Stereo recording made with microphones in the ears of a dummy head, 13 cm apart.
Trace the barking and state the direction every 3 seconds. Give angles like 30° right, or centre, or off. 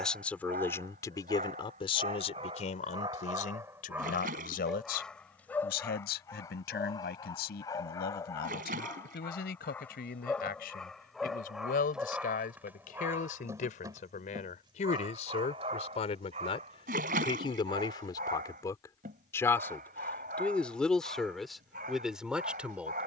50° right, 10° right, 20° left, 10° left, 20° right, 50° right, 60° right, 60° right.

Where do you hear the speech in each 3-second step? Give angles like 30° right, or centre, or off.
30° left, 70° left, 80° left, 70° left, 60° left, 40° left, 20° left, centre.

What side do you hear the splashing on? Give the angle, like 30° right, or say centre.
60° right.